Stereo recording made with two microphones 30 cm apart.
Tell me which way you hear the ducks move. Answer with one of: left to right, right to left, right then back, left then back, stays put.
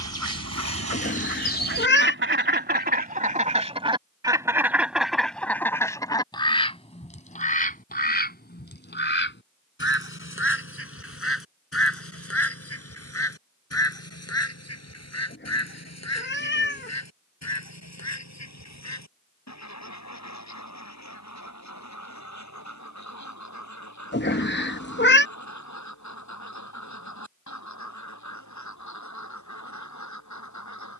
right to left.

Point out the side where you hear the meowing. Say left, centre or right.
left.